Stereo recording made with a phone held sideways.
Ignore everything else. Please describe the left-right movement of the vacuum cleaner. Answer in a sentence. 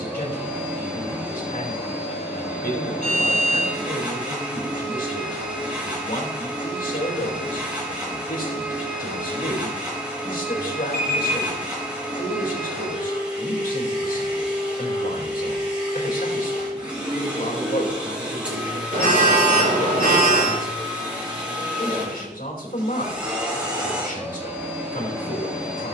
In this clip you hear the vacuum cleaner stay in one place.